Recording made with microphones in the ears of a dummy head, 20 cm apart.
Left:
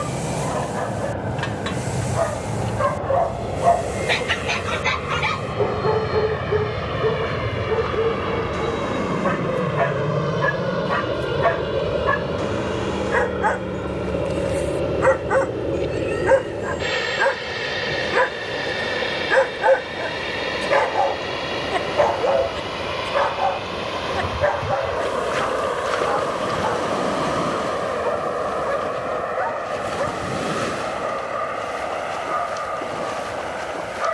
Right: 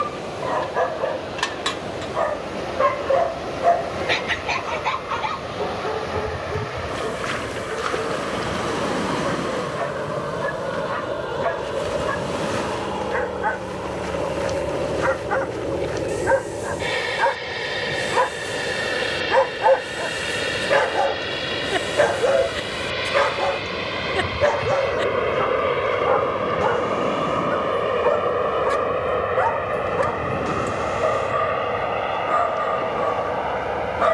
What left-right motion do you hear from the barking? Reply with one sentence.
In this clip you hear the barking move from right to left and back again.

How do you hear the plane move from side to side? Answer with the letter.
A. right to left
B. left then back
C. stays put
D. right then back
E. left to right
E.